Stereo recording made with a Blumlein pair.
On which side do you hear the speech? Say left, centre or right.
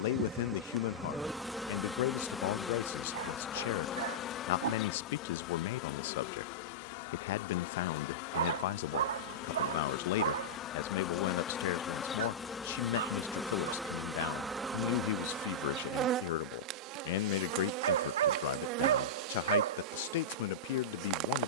left.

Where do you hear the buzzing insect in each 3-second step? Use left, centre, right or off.
centre, left, left, left, centre, right, right.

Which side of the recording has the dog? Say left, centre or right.
right.